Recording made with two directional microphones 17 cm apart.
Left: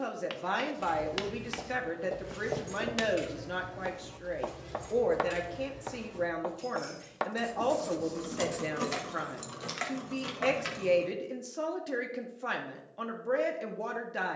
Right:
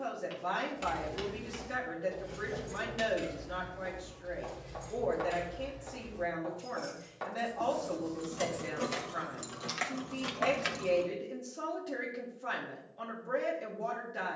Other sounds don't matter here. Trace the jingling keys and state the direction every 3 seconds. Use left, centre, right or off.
centre, left, left, centre, off.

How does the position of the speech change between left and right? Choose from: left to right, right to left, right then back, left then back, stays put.
stays put.